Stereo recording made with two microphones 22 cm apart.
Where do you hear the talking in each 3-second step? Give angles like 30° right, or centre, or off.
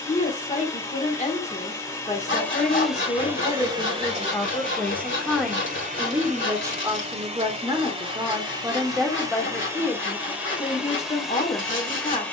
30° left, 20° left, 10° right, 20° left.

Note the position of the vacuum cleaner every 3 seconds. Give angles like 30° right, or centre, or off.
10° left, 30° right, 30° right, 10° right.